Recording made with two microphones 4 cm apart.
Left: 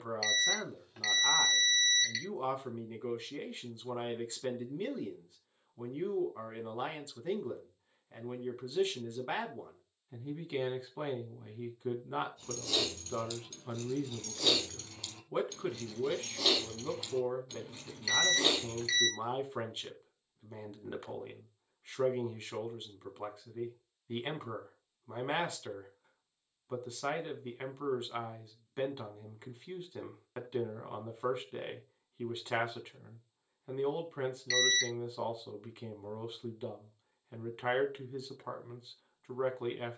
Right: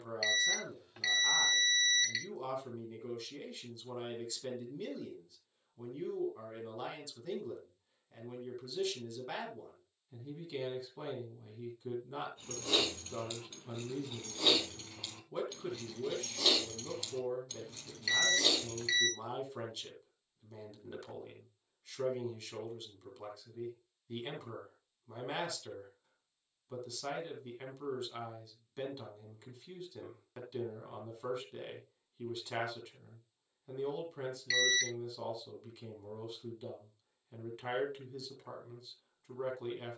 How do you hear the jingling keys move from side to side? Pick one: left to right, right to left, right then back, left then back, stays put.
right to left.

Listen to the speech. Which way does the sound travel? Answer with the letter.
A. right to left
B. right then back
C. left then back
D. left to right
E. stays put
E.